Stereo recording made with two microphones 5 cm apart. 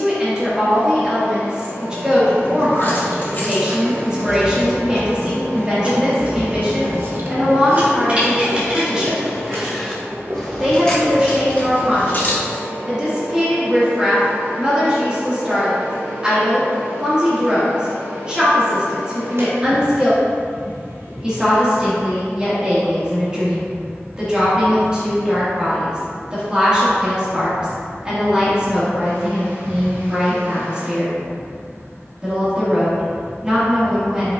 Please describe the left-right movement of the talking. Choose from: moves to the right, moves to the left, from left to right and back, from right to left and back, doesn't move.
doesn't move.